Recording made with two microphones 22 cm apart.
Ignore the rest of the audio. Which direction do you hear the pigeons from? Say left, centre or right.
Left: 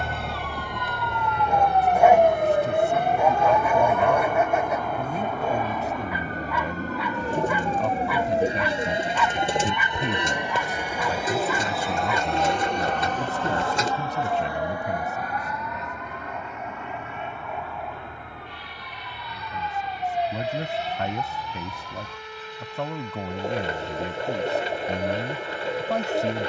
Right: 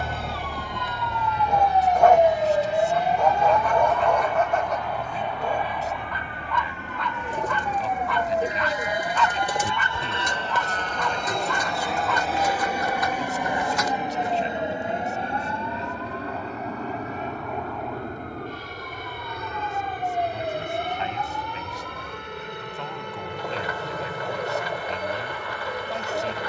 left.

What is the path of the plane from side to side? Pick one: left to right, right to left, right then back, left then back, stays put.
left to right.